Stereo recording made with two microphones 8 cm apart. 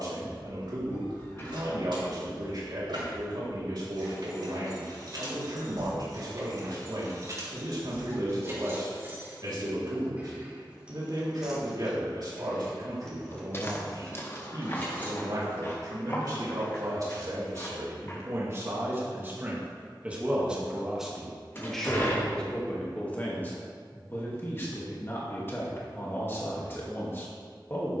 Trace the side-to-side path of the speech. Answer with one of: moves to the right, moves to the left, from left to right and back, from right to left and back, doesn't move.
moves to the left.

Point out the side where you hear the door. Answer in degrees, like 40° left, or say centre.
30° left.